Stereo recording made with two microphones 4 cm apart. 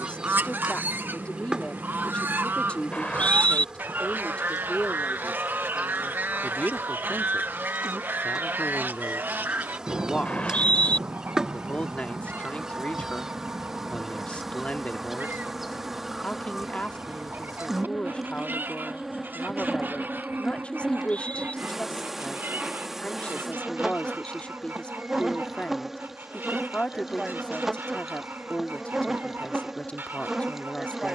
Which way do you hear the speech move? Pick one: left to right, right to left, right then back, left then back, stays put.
stays put.